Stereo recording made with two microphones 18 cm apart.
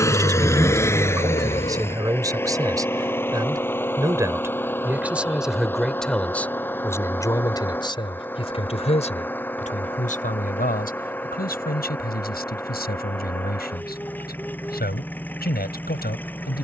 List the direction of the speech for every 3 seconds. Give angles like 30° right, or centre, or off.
20° right, 10° right, 20° left, 50° left, 60° left, 60° left.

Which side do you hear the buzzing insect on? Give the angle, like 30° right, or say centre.
30° left.